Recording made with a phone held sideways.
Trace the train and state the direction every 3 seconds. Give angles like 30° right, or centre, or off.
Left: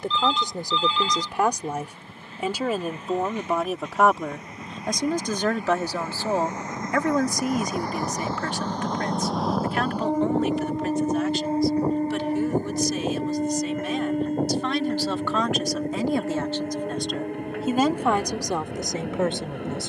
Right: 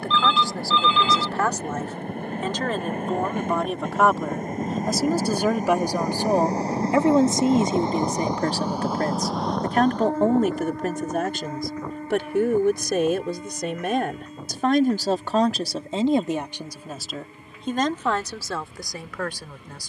70° right, 50° right, 30° right, 20° left, 50° left, 70° left, 70° left.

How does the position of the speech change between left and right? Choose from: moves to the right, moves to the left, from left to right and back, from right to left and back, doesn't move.
from left to right and back.